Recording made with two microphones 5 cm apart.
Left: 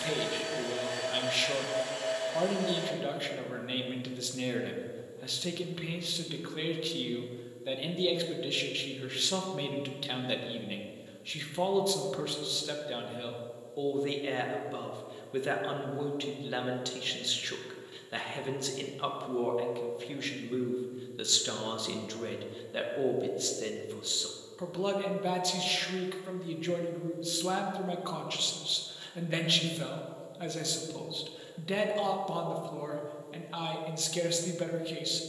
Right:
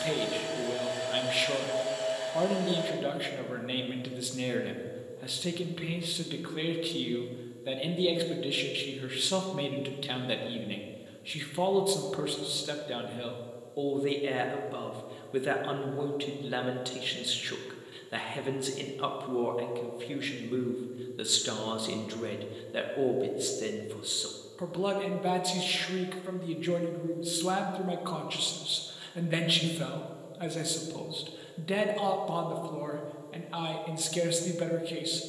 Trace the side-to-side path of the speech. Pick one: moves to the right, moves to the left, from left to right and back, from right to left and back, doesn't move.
doesn't move.